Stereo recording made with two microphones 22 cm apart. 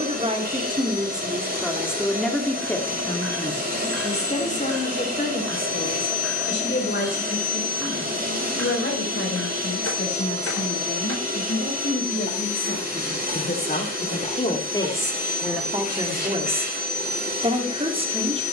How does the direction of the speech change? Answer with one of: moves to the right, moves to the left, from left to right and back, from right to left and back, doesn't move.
from right to left and back.